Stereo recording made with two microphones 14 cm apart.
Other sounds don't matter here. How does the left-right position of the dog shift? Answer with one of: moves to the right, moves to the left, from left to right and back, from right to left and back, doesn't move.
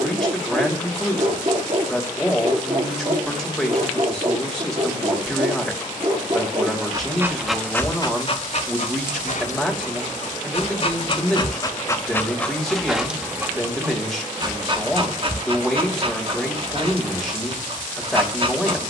from right to left and back.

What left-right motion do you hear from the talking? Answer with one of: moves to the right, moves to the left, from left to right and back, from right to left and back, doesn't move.
doesn't move.